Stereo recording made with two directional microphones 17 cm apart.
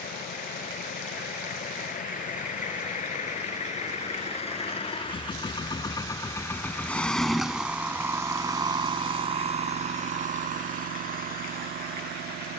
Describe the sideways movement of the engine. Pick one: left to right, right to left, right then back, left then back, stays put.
left to right.